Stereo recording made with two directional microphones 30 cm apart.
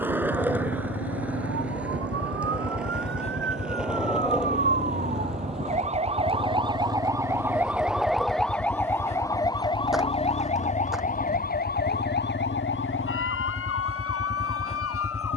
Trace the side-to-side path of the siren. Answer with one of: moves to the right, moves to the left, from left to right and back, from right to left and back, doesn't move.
moves to the left.